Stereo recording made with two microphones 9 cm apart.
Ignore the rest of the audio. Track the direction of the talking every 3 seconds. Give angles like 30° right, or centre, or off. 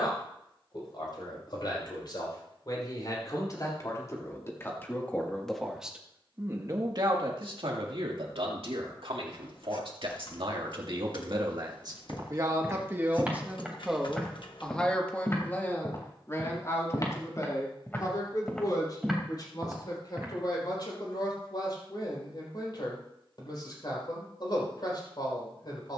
50° left, 20° left, 60° right, 60° right, 10° right, 30° left, 50° left, 50° left, 50° left.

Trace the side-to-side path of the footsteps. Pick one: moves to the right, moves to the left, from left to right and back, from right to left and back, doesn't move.
from right to left and back.